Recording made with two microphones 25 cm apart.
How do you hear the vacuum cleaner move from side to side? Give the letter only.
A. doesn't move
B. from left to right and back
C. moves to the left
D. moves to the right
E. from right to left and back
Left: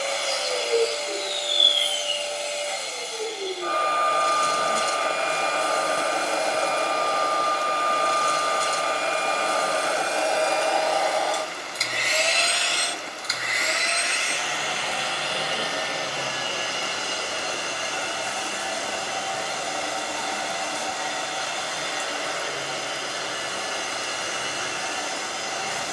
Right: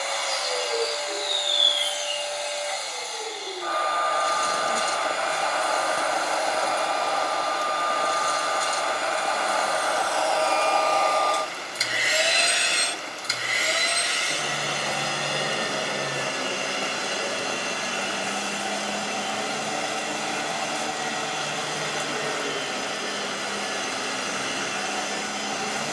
D.